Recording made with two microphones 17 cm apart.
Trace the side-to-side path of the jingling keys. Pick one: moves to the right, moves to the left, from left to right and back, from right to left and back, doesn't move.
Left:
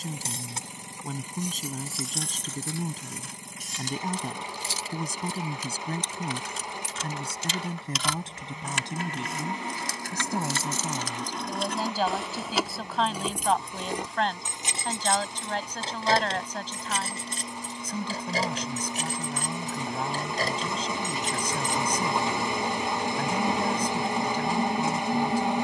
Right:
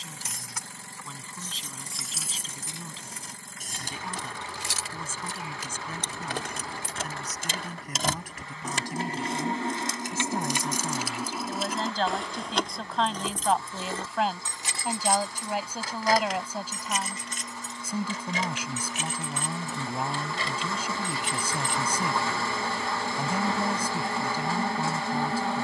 from left to right and back.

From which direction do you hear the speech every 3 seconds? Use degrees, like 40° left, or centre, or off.
40° left, 40° left, 30° left, 10° left, centre, 10° right, 10° right, 10° right, 10° right.